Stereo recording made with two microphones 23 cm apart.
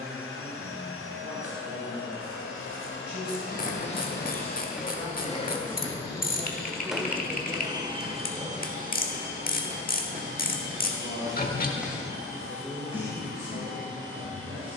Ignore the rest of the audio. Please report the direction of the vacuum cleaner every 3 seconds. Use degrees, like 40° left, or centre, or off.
60° left, 40° left, 10° right, 50° right, 70° right.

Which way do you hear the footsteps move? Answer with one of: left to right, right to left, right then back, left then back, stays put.
right then back.